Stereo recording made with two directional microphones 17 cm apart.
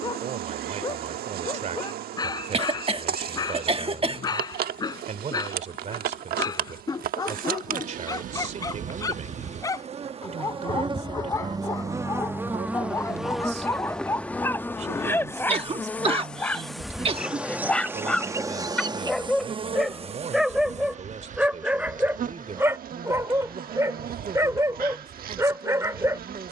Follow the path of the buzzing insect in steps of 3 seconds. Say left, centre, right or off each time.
right, right, right, right, centre, centre, right, right, right.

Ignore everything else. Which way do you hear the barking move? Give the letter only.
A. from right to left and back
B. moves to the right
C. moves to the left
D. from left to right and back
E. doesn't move
B.